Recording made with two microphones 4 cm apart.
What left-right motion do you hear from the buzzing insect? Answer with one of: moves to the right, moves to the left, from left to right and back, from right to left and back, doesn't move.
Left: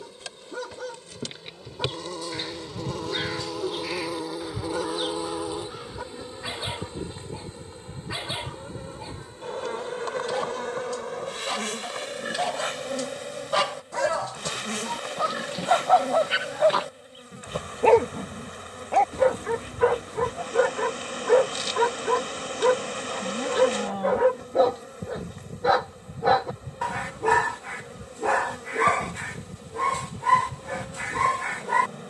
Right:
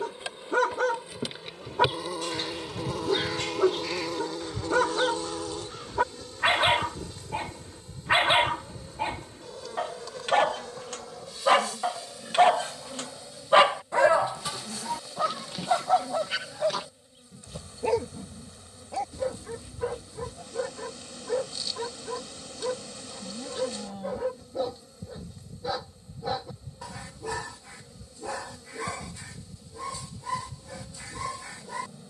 moves to the left.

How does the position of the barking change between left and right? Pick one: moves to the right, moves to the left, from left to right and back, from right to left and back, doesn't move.
moves to the left.